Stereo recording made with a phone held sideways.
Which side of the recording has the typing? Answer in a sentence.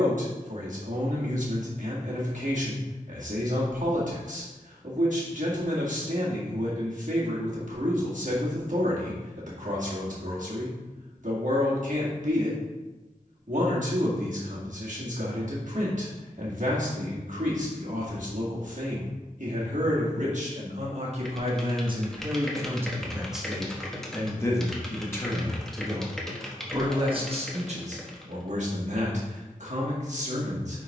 You can hear the typing in the centre.